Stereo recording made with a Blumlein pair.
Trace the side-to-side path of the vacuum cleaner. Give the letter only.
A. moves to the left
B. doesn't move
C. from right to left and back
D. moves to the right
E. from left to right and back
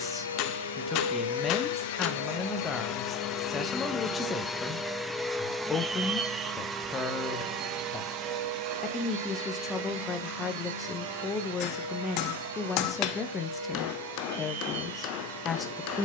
D.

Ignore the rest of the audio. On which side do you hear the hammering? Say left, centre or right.
left.